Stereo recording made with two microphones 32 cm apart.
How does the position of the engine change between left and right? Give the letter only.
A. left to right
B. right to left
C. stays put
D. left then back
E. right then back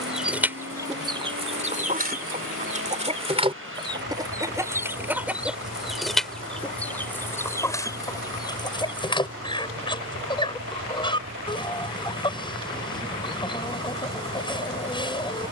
C.